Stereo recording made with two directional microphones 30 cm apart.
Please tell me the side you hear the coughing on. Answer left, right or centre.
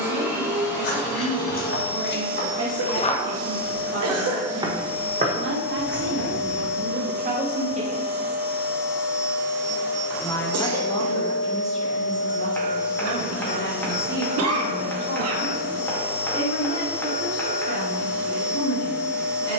right.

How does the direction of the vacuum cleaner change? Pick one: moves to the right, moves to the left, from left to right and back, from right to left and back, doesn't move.
doesn't move.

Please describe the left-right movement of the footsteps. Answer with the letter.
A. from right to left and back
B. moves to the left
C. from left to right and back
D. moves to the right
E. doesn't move
D.